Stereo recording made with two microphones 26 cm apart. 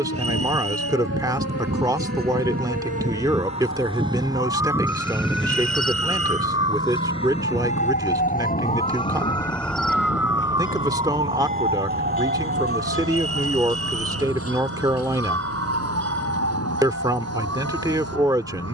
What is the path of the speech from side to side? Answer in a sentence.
You can hear the speech stay in one place.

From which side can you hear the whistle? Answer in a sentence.
In this clip you hear the whistle on the right.